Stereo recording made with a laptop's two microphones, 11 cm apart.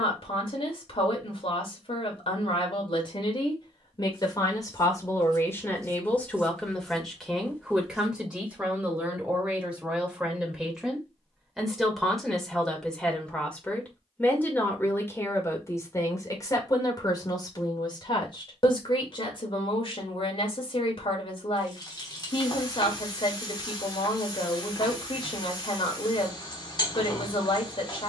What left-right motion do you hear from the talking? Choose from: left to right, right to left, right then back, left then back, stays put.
right then back.